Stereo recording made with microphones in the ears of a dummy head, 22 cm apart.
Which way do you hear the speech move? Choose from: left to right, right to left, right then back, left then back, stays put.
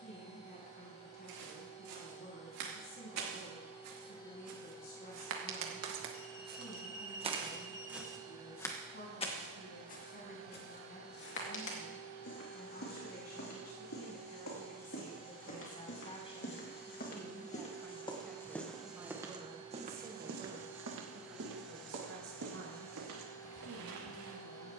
left to right.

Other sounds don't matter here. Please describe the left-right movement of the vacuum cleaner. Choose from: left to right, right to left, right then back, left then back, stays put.
right then back.